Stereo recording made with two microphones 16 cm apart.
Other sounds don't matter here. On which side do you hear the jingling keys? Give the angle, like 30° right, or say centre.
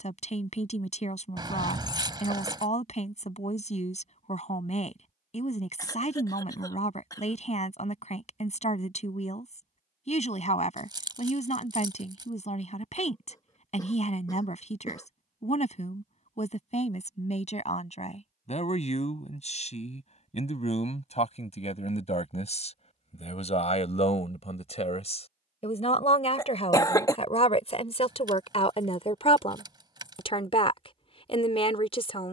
30° right.